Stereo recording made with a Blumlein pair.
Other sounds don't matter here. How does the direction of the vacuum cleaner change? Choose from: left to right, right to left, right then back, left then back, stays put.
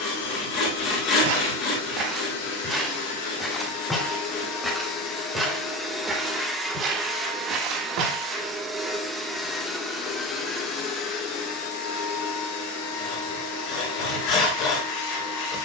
right then back.